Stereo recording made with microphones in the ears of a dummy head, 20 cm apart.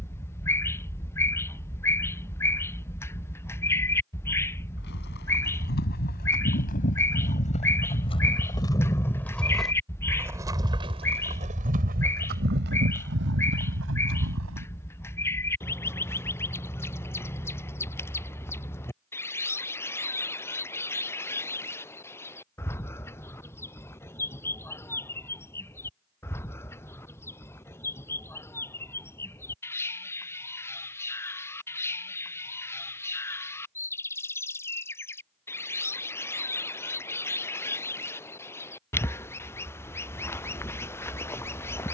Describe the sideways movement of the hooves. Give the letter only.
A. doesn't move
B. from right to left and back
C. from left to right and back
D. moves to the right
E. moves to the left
D.